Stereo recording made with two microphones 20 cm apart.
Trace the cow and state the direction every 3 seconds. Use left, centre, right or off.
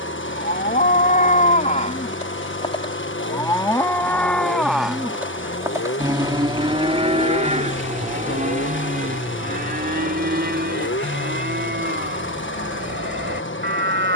left, centre, right, right, right.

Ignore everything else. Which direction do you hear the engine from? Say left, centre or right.
left.